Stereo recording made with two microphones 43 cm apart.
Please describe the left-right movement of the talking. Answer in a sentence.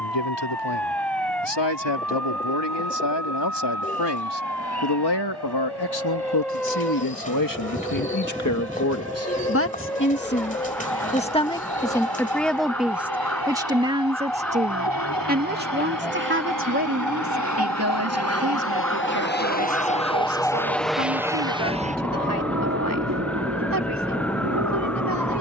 You can hear the talking go from the left side to the right.